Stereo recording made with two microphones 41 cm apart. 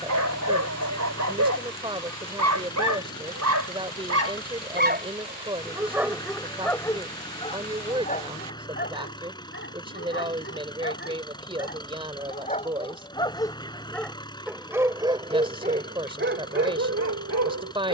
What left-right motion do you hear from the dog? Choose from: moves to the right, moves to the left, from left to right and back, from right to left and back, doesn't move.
from right to left and back.